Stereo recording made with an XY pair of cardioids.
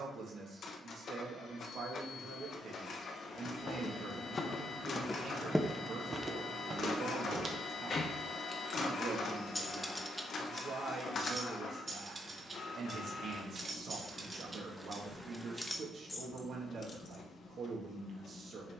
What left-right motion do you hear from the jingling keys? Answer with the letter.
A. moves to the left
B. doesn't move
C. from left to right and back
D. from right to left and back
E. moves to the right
C.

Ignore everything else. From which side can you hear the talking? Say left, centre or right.
right.